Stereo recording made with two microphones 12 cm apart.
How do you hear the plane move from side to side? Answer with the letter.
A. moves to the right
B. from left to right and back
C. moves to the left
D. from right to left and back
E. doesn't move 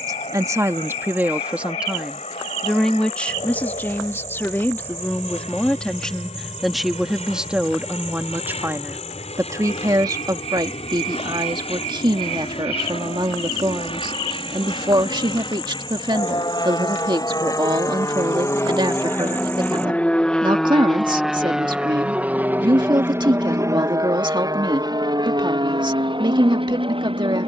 A.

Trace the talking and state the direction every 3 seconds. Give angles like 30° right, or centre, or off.
10° right, 10° left, 10° right, 30° right, 40° right, 40° right, 40° right, 40° right, 40° right.